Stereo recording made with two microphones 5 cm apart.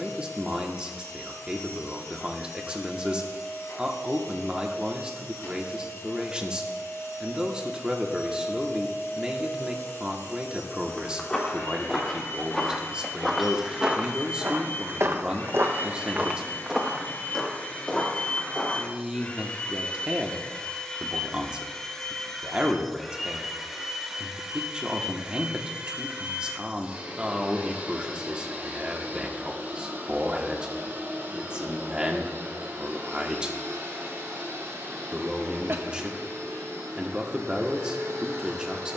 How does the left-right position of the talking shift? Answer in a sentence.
In this clip you hear the talking stay put.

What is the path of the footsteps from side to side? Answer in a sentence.
In this clip you hear the footsteps move from left to right and back again.